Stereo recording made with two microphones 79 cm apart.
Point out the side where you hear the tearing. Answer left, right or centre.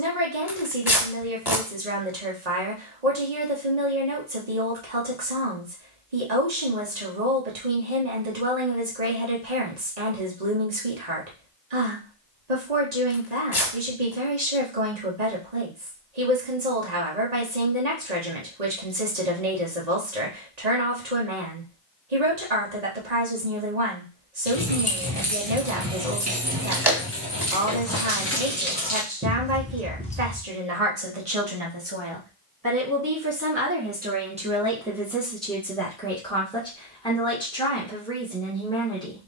left.